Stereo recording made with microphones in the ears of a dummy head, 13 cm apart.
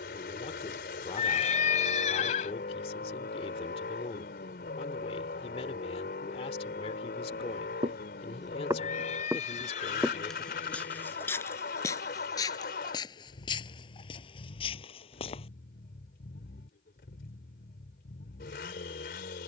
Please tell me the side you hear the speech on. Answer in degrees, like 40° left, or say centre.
40° left.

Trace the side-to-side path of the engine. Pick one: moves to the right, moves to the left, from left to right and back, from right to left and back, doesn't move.
doesn't move.